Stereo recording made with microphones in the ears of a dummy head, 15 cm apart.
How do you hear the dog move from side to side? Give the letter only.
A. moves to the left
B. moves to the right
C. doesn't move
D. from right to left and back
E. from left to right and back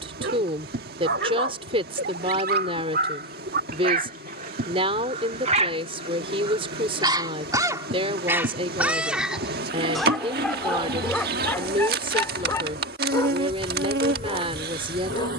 A.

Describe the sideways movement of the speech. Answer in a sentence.
In this clip you hear the speech stay in one place.